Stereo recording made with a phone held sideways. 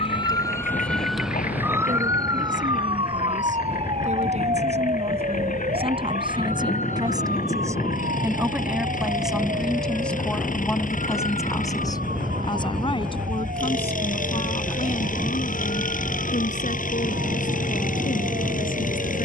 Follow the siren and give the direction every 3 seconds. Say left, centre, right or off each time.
centre, right, right, right, right, right, right.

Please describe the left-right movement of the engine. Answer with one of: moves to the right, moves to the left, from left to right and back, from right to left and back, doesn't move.
doesn't move.